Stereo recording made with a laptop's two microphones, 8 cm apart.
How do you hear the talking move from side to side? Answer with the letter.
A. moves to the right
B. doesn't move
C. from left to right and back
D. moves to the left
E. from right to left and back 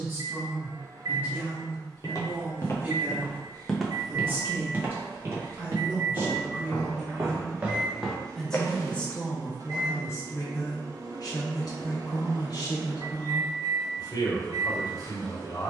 D.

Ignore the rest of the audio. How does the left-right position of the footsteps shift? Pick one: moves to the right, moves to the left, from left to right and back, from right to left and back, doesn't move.
from left to right and back.